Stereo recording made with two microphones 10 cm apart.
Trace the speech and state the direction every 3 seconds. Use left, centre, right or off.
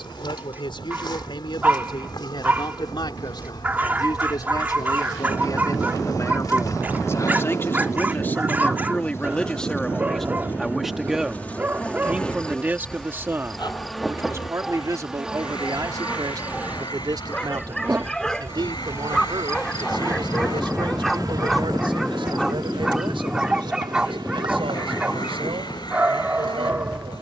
left, left, left, centre, right, right, right, right, right.